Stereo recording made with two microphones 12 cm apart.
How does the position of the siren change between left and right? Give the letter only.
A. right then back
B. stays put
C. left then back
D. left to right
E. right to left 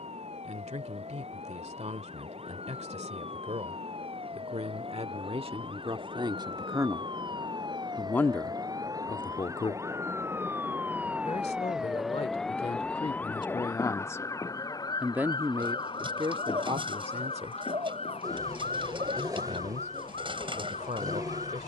E.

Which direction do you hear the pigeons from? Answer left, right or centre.
right.